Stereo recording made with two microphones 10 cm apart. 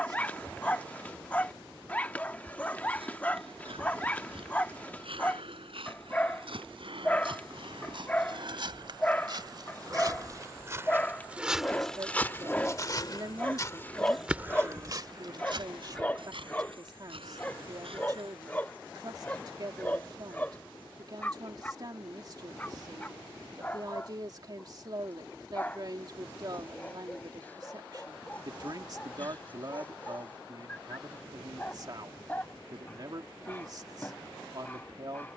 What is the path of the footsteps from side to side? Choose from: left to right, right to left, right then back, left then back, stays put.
left then back.